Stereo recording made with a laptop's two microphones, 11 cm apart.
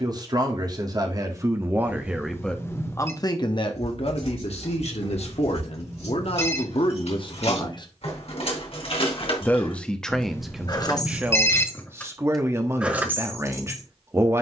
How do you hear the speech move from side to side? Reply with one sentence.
You can hear the speech move from right to left and back again.